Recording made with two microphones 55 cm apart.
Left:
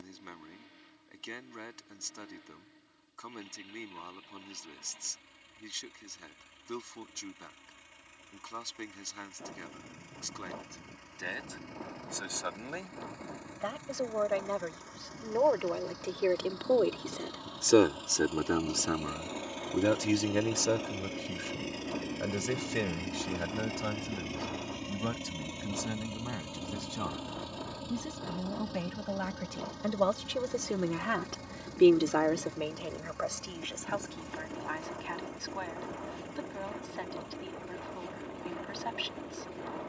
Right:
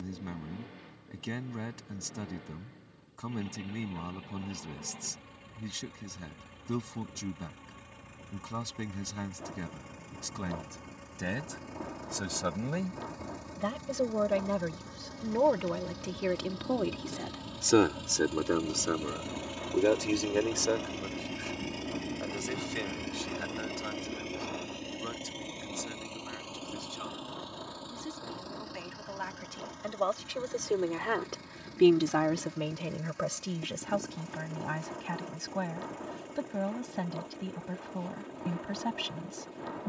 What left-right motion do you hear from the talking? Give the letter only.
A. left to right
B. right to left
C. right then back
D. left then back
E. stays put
D.